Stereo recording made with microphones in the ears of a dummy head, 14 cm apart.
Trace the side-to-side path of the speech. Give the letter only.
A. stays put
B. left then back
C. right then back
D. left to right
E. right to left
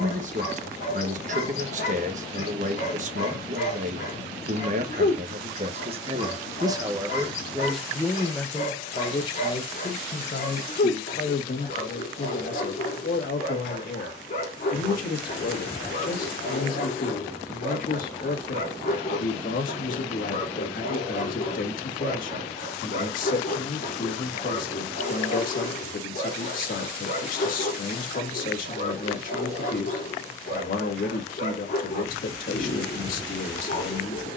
E.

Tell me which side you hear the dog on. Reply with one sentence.
You can hear the dog on the left.